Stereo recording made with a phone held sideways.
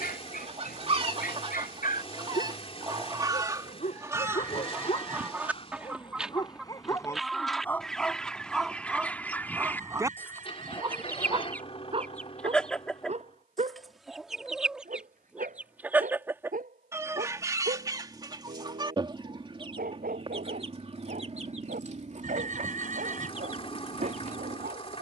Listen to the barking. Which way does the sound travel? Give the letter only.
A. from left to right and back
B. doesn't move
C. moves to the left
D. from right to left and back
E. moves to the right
E.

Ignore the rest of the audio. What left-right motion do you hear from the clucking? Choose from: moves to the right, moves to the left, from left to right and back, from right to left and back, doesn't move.
from right to left and back.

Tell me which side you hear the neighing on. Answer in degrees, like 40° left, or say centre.
60° right.